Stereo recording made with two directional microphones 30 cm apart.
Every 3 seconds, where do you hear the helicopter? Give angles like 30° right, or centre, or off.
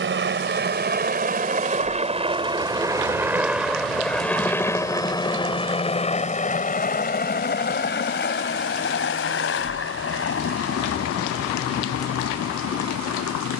30° right, 10° left, 30° left, 50° left, 50° left.